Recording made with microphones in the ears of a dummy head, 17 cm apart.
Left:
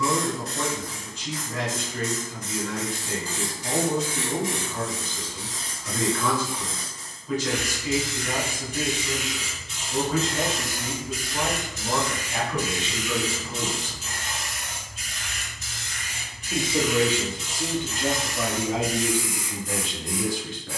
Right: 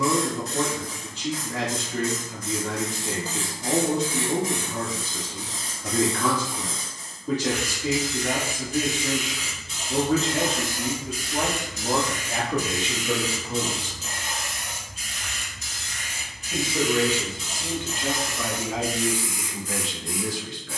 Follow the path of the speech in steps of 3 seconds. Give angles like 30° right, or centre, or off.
50° right, 50° right, 50° right, 50° right, 30° right, 20° left, 40° left.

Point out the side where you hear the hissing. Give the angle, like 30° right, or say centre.
70° right.